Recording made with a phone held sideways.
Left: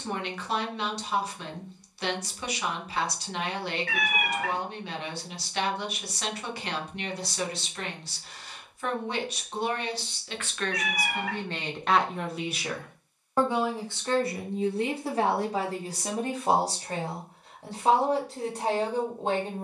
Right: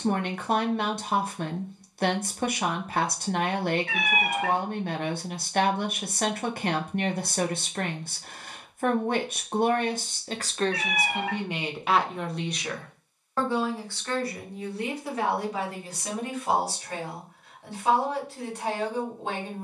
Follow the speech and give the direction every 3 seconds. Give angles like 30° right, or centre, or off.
50° right, 50° right, 50° right, 30° right, 20° left, 30° left, 30° left.